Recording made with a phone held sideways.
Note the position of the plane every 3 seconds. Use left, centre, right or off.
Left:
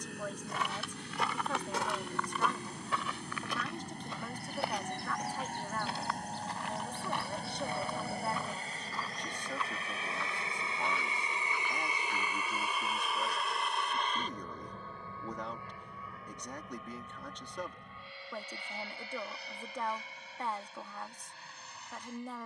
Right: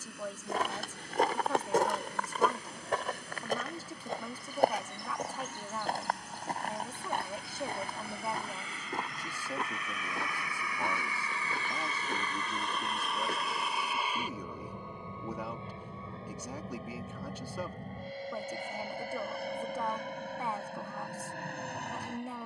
left, left, left, left, centre, right, right, right.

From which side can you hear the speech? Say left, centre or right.
centre.